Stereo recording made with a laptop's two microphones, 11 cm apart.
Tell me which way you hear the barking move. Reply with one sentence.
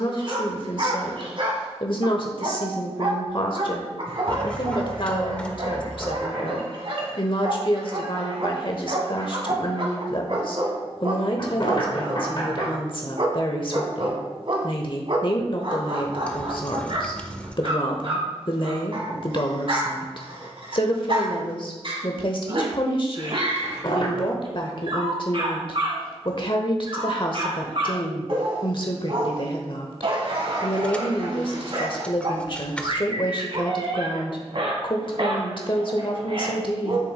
You can hear the barking stay put.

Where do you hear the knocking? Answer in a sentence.
You can hear the knocking on the left.